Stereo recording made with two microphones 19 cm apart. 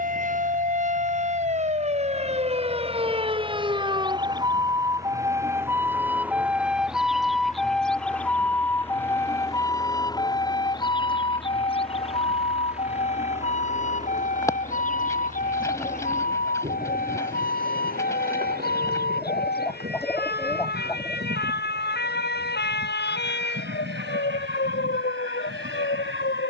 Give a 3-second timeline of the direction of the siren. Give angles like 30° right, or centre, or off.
40° right, 20° right, centre, 20° left, 40° left, 50° left, 60° left, 60° left, 60° left.